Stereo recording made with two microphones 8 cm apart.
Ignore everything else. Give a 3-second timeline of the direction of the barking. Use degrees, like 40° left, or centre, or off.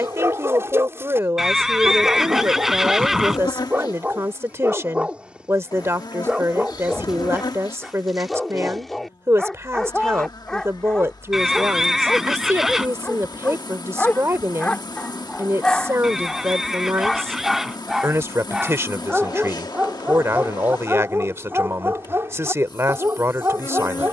30° right, 20° right, centre, 10° left, 20° left, 10° left, 10° right, 30° right.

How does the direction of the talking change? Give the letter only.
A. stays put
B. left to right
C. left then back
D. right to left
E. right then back
A.